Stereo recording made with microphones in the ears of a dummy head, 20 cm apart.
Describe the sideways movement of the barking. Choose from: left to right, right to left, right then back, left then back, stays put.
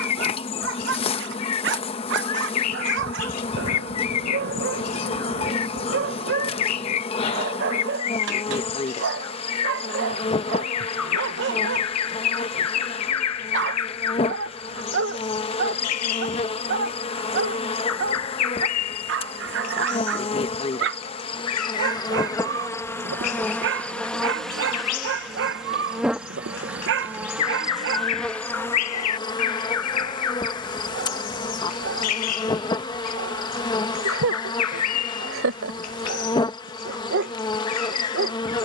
stays put.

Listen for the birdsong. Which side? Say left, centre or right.
left.